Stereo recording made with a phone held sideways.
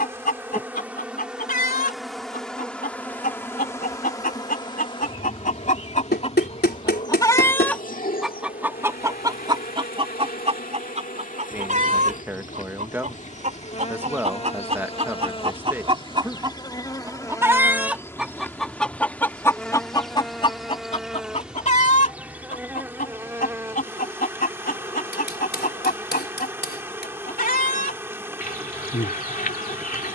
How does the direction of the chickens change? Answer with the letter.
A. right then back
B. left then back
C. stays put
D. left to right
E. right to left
A.